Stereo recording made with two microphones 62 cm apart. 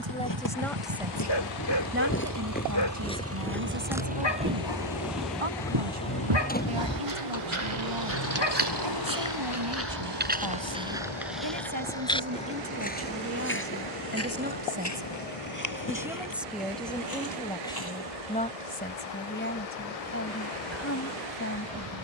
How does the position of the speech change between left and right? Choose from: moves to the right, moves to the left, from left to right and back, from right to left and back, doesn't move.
from left to right and back.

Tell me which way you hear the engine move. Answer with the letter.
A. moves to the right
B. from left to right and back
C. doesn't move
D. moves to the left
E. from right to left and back
D.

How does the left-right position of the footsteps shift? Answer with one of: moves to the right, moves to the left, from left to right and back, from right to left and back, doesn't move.
from left to right and back.